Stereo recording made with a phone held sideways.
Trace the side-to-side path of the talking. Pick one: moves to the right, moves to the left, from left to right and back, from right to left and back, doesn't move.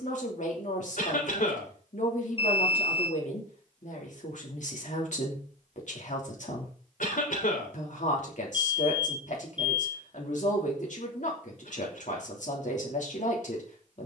doesn't move.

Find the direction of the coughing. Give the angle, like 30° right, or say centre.
70° left.